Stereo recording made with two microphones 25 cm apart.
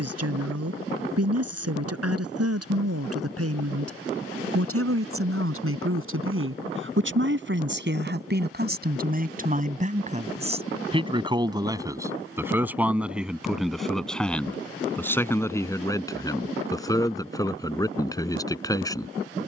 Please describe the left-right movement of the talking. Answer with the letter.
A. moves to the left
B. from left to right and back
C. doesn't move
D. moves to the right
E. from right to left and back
A.